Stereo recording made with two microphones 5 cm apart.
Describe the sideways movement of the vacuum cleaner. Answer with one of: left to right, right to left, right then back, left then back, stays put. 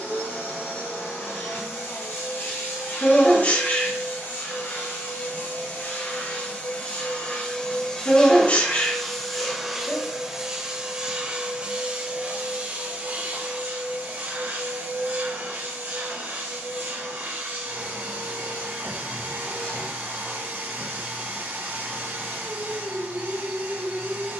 left to right.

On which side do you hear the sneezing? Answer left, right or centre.
left.